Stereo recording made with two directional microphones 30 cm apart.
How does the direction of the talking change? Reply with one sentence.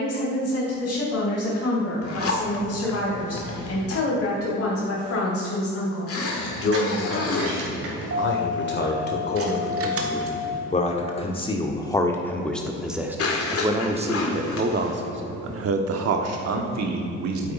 You can hear the talking go from the left side to the right.